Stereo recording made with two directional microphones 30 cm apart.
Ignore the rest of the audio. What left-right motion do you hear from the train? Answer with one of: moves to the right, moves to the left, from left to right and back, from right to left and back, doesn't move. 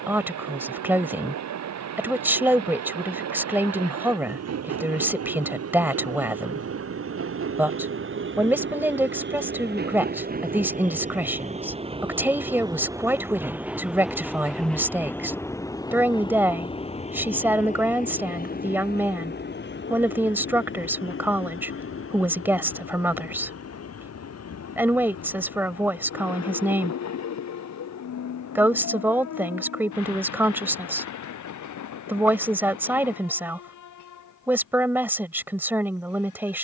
moves to the left.